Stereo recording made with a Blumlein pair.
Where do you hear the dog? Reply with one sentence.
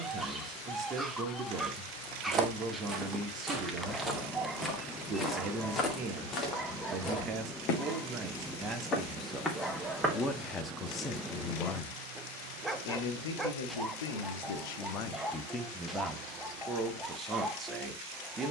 You can hear the dog in the centre.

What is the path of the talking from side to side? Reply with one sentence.
In this clip you hear the talking move from right to left and back again.